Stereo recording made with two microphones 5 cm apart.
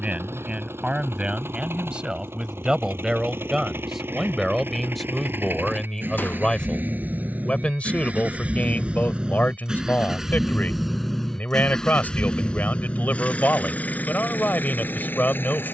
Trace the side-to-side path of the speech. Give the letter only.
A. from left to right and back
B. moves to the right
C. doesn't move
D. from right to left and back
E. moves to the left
E.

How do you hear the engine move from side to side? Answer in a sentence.
You can hear the engine go from the right side to the left.